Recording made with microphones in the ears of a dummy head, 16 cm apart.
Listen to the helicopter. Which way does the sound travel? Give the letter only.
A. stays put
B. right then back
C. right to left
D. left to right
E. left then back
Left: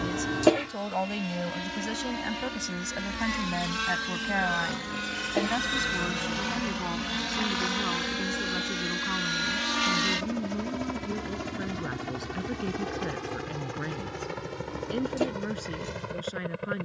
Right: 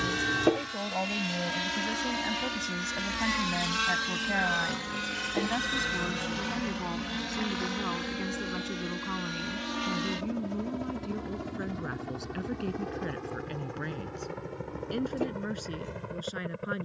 C.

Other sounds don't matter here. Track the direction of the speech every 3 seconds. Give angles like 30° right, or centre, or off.
20° left, 10° left, centre, centre, centre, centre.